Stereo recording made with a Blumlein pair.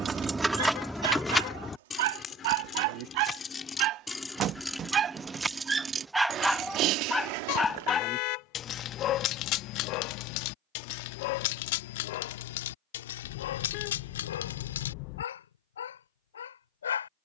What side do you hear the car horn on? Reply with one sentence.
You can hear the car horn on the left.